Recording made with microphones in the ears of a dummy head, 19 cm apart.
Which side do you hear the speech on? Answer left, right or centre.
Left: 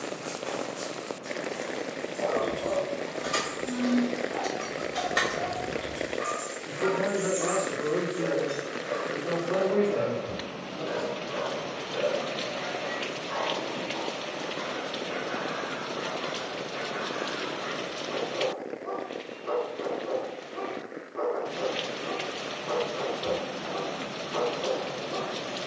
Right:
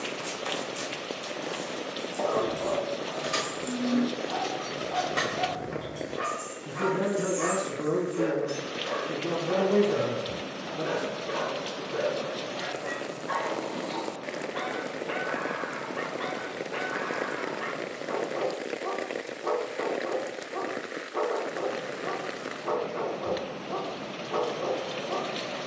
right.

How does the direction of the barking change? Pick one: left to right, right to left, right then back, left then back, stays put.
stays put.